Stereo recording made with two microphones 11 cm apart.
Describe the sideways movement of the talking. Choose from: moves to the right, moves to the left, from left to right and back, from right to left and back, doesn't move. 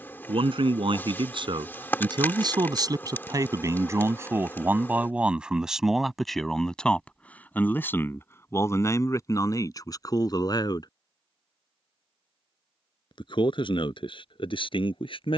moves to the left.